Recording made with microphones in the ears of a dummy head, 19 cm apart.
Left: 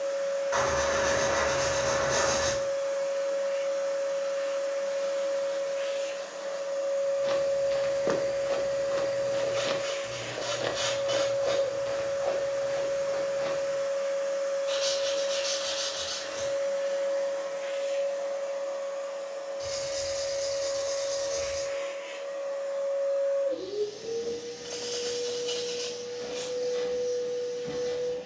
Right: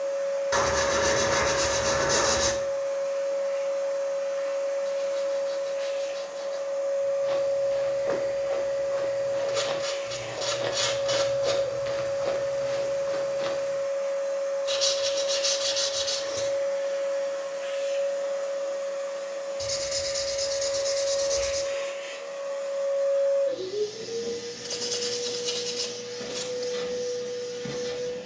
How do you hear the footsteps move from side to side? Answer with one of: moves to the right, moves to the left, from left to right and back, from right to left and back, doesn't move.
moves to the right.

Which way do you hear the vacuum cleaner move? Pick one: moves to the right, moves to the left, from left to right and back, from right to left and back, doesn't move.
moves to the right.